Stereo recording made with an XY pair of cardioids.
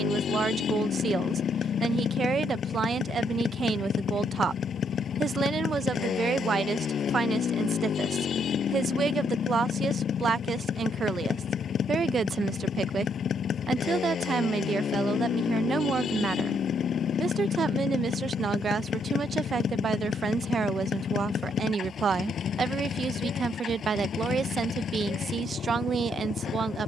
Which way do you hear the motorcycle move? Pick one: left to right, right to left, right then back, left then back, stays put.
stays put.